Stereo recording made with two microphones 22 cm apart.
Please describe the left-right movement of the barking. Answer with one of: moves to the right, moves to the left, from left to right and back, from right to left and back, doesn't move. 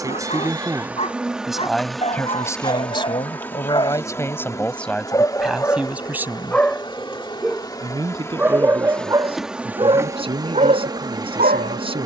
moves to the right.